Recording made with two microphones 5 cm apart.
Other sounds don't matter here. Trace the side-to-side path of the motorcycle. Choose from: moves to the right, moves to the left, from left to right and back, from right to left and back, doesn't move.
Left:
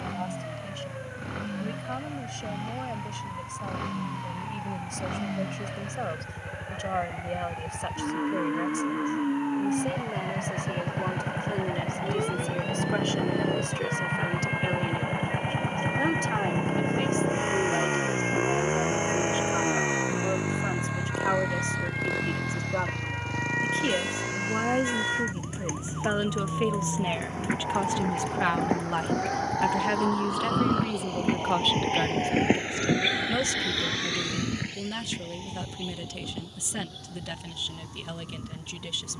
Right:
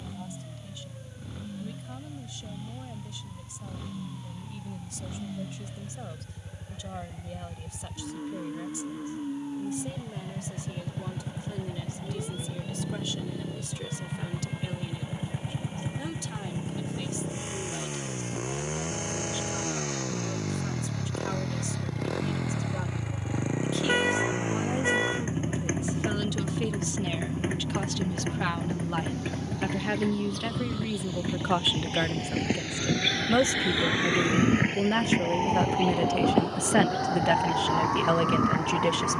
moves to the right.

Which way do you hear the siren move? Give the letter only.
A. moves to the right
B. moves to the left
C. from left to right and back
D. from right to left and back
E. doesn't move
A.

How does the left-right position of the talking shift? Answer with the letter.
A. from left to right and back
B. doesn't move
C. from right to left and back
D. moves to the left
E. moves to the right
E.